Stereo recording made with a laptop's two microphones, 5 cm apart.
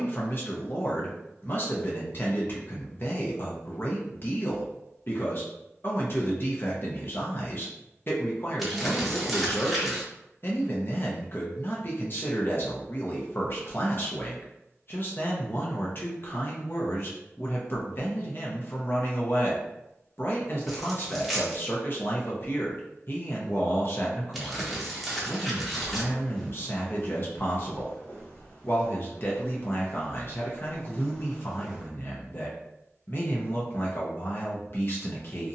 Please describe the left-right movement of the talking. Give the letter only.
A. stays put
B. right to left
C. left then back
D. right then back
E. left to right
A.